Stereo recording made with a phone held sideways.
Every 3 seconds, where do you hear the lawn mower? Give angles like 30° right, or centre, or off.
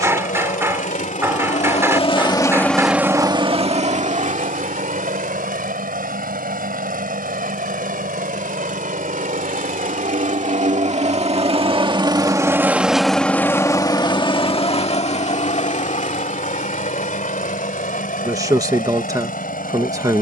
50° left, 60° right, 70° right, 50° right, 10° left, 60° left, 70° left.